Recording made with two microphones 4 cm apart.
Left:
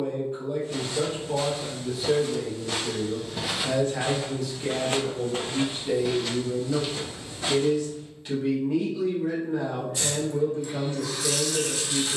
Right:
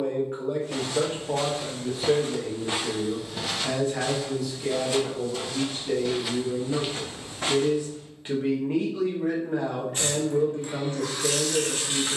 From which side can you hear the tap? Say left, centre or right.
right.